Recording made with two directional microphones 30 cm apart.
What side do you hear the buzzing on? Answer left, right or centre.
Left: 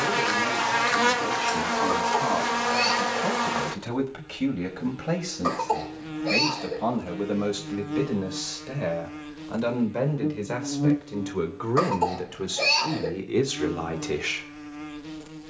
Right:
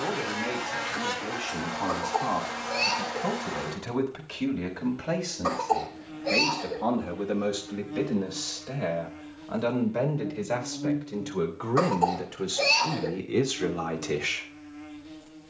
left.